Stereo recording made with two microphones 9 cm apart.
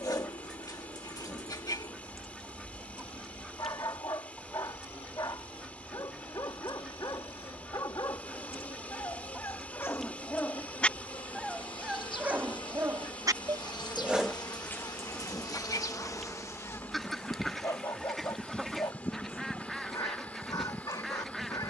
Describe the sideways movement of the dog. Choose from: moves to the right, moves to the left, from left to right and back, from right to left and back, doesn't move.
from left to right and back.